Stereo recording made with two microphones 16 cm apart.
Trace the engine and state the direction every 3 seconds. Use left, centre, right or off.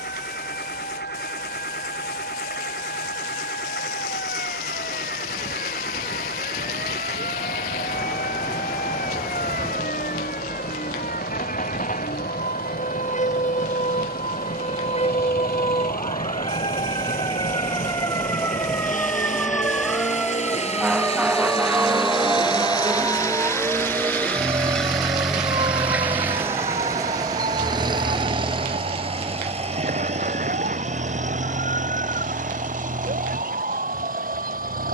left, left, left, left, left, left, left, left, centre, right, right, right.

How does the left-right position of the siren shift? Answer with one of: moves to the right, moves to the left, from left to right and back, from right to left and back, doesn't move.
moves to the right.